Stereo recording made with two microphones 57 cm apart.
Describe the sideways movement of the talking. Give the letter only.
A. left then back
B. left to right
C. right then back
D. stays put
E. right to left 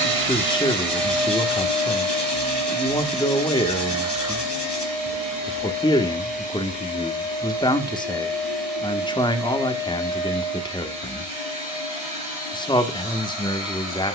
D.